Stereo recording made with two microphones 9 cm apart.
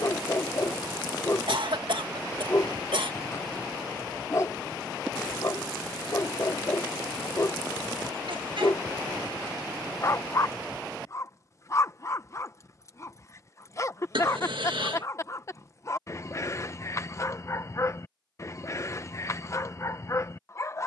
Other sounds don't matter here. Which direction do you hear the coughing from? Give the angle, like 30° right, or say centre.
80° right.